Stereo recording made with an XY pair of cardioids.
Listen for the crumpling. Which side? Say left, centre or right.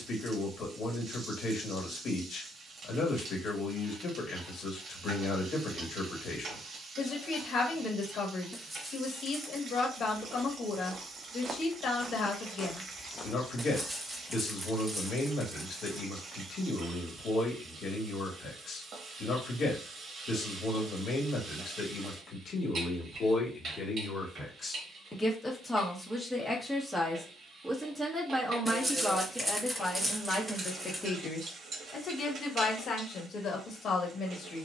centre.